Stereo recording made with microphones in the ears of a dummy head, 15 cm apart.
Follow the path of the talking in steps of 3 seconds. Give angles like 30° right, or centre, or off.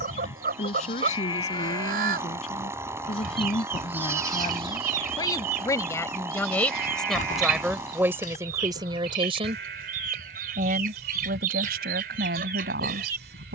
50° left, 30° left, 10° right, 50° right, 70° right.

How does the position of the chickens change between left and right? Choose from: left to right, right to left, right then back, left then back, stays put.
stays put.